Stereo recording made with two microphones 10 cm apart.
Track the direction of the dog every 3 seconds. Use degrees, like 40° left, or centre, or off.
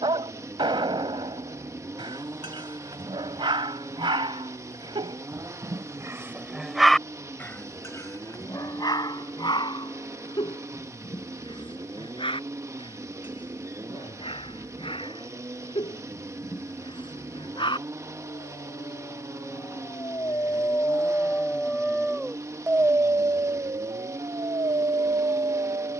50° right, 50° right, 10° left, 60° left, 60° left, 60° left, 40° left, 10° right, 50° right.